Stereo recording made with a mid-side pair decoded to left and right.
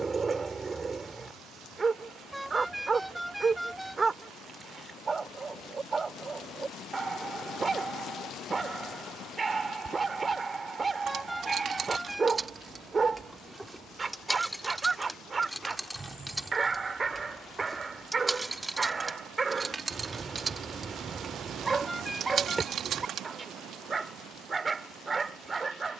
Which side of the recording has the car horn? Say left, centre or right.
centre.